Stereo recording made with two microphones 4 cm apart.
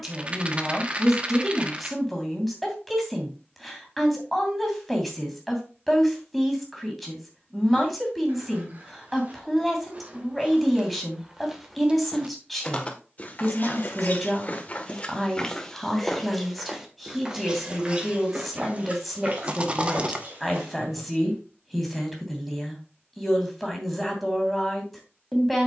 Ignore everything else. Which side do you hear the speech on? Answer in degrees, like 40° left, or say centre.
centre.